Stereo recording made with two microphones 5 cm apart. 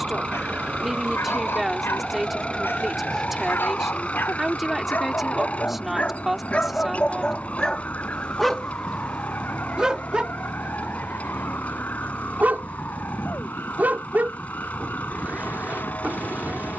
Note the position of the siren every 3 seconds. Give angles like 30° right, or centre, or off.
10° right, 20° left, 40° left, 40° left, 50° left, 50° left.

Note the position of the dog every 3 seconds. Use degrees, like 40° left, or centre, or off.
60° left, 50° left, 20° left, 30° right, 40° right, 40° right.